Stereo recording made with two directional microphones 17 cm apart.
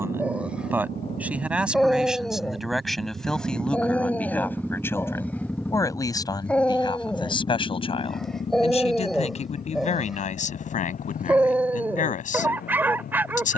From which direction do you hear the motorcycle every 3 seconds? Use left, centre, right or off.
right, centre, left, left, left.